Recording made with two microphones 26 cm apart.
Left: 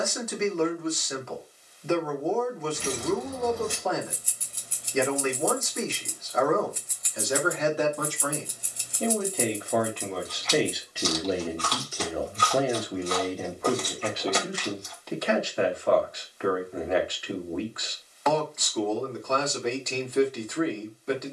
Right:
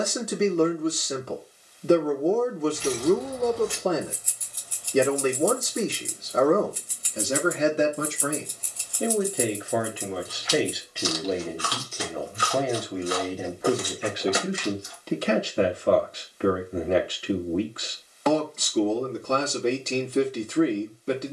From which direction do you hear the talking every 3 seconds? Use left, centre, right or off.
right, right, right, centre, centre, right, right.